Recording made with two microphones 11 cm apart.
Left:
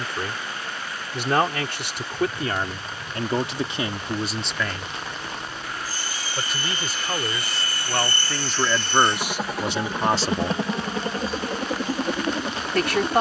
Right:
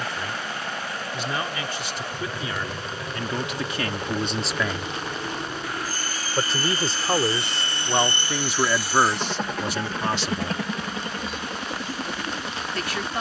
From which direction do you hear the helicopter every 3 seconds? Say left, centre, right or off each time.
right, right, right, left, left.